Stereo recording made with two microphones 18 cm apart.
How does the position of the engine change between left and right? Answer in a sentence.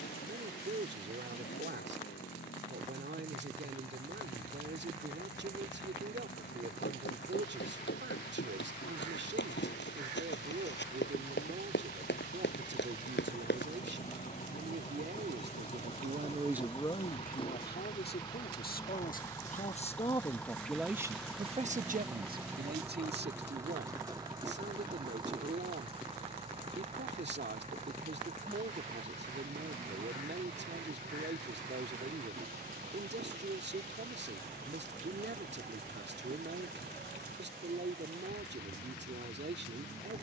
In this clip you hear the engine go from the left side to the right.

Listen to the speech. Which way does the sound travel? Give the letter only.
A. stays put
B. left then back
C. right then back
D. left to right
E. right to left
B.